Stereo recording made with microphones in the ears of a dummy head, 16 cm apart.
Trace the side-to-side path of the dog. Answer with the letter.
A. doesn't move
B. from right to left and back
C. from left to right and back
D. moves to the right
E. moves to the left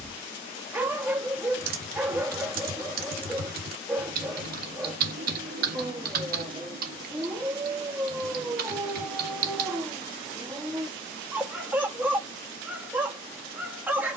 A.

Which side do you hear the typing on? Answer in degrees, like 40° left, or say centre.
60° right.